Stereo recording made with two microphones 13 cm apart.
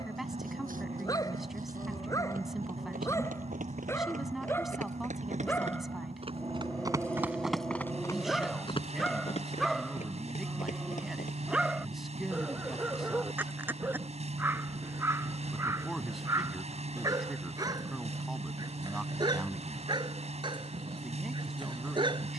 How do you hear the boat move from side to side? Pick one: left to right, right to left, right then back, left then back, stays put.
stays put.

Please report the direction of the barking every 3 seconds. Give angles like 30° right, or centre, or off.
30° left, 20° left, 10° left, centre, 10° right, 20° right, 30° right, 30° right.